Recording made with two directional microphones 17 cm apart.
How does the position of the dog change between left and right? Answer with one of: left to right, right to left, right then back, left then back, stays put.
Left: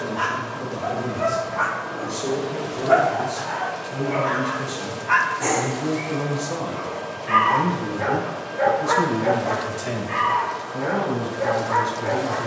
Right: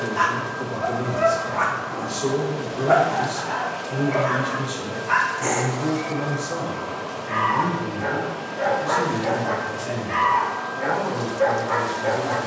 left then back.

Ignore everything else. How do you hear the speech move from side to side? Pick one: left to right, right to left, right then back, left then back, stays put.
right to left.